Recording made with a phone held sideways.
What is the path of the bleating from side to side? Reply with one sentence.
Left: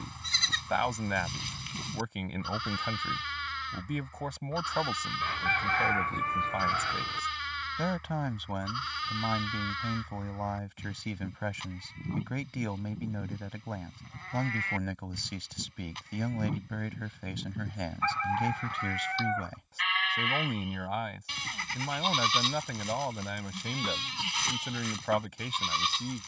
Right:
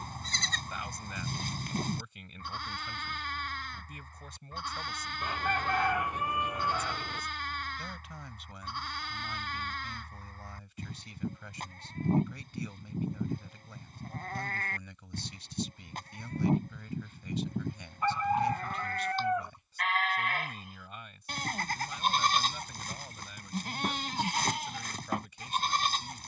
In this clip you hear the bleating stay in one place.